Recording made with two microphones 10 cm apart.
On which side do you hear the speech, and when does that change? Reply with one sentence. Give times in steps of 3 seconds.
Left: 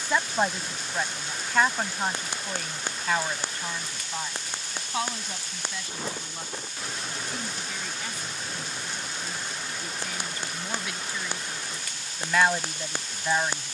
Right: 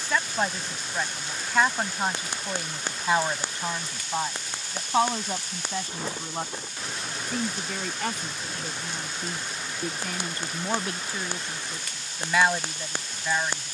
You can hear the speech in the centre from 0 s, on the right from 3 s and in the centre from 12 s.